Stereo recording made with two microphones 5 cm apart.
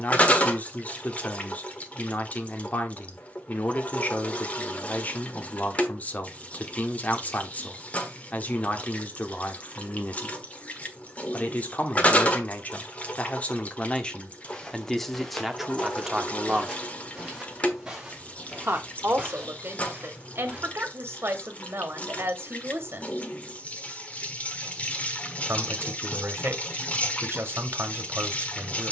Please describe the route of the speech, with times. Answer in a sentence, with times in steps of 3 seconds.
You can hear the speech on the left from 0 s, in the centre from 15 s and on the right from 18 s.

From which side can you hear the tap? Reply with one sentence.
In this clip you hear the tap on the left.